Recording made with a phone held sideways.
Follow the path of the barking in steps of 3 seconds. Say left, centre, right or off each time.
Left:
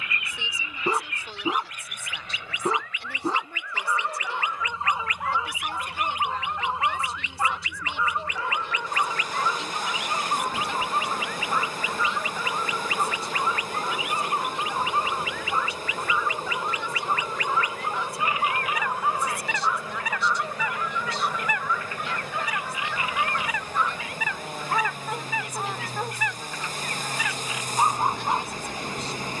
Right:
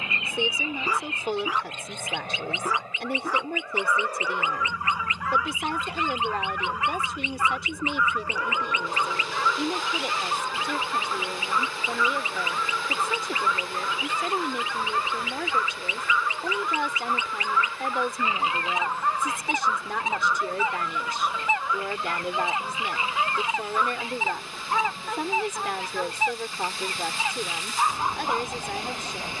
left, left, left, left, left, left, centre, centre, centre, left.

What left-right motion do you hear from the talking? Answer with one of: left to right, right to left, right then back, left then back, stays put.
stays put.